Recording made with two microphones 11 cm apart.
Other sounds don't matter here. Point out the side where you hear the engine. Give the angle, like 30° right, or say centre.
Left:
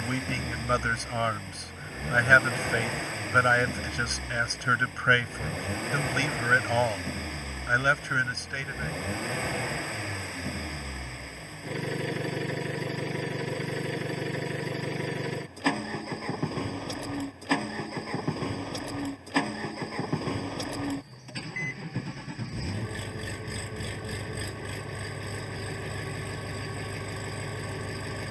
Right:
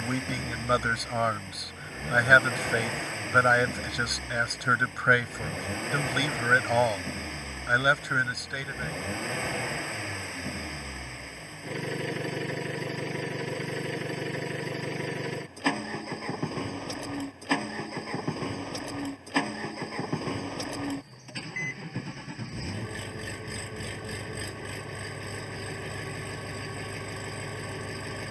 centre.